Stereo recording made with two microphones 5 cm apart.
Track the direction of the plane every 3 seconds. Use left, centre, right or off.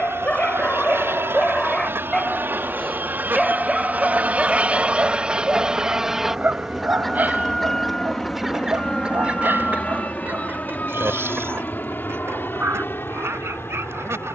right, right, centre, left, left.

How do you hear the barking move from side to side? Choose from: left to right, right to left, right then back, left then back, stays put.
left to right.